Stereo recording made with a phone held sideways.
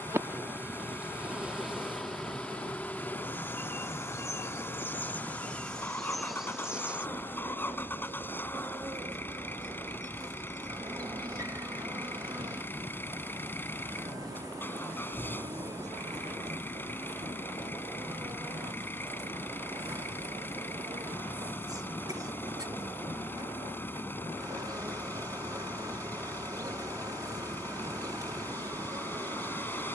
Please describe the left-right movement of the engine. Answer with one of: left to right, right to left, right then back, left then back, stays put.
stays put.